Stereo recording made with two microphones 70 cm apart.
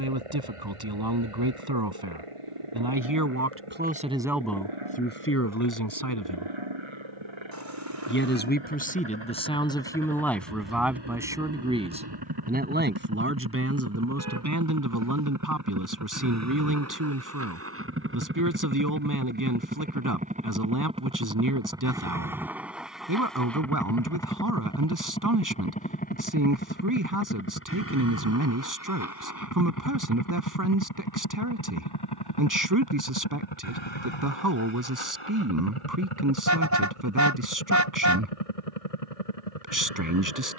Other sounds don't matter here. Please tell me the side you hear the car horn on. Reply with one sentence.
You can hear the car horn on the right.